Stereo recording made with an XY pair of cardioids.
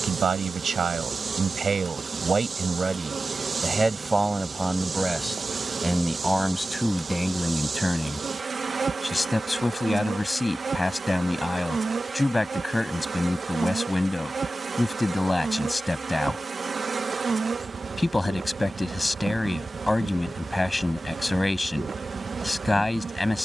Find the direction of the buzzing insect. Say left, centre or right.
right.